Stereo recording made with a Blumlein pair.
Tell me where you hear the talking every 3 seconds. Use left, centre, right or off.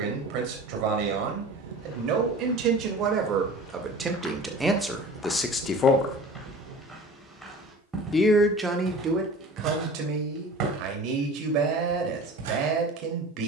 right, centre, centre, right, right.